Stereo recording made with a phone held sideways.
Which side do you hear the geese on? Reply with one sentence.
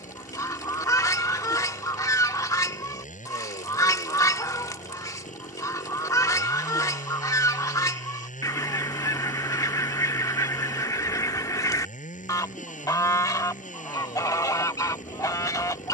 You can hear the geese on the left.